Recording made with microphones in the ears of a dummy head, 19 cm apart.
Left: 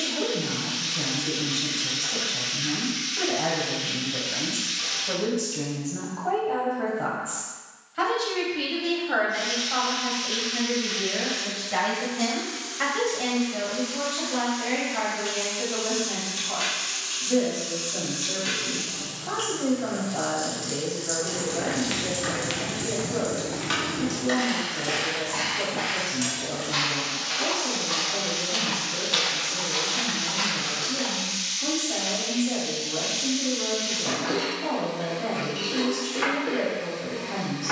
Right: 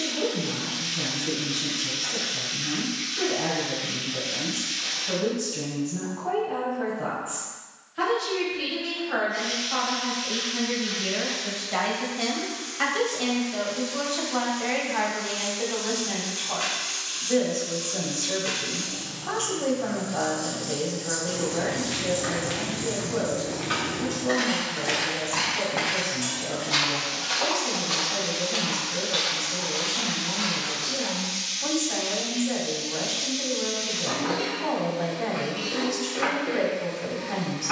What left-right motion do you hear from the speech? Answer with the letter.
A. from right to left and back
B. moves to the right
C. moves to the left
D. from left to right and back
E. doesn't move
B.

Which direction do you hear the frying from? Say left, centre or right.
left.